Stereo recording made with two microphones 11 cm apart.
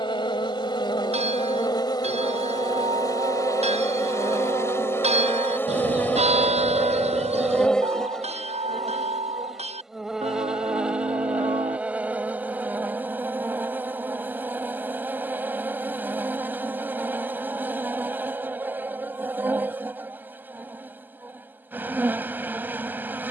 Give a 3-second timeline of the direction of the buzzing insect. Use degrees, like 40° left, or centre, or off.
40° left, 30° left, 10° left, 10° right, 20° right, 20° right, 20° right, 20° right.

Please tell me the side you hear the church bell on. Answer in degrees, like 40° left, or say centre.
70° right.